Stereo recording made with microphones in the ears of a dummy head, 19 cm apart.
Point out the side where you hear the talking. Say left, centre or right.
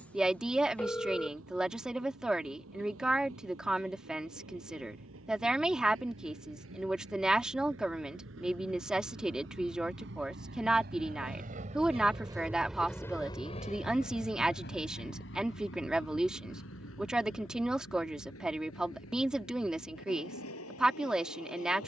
centre.